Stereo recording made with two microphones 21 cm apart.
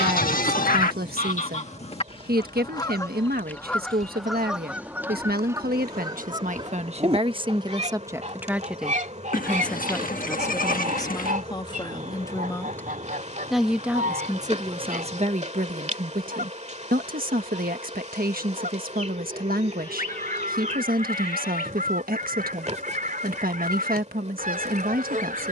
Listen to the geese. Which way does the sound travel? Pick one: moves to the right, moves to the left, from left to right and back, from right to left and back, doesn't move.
moves to the right.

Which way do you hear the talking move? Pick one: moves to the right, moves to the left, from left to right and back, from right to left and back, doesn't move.
from right to left and back.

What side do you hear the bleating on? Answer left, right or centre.
left.